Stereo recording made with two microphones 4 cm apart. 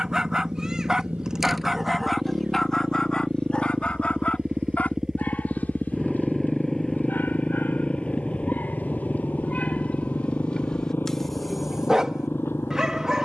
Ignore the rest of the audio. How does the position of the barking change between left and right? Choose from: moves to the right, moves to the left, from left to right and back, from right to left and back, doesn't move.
from right to left and back.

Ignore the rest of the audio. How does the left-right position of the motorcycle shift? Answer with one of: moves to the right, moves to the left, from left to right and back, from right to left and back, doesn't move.
moves to the left.